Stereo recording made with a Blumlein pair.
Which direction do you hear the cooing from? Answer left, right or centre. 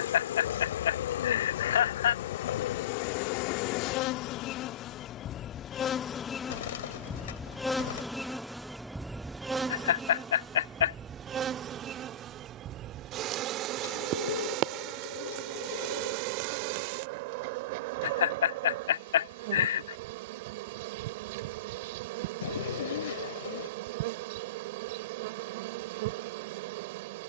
left.